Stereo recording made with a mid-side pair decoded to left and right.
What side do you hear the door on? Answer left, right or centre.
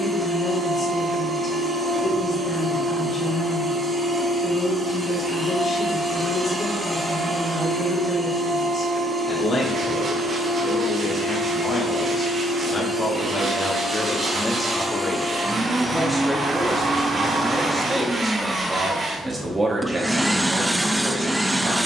right.